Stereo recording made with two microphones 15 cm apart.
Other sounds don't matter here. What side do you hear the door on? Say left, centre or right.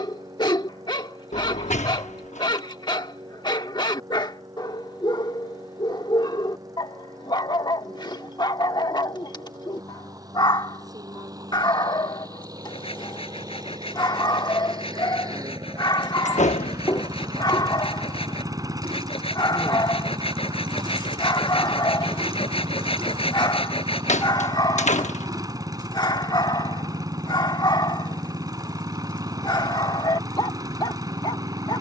left.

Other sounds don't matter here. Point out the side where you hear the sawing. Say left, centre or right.
left.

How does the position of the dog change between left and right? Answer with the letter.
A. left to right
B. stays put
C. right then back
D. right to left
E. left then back
B.